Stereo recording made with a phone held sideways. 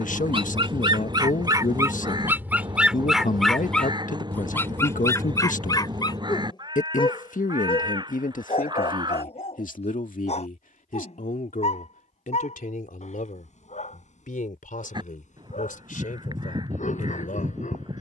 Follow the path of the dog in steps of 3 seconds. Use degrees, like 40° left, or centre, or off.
30° right, 20° left, 40° left, 50° left, 60° left, 60° left.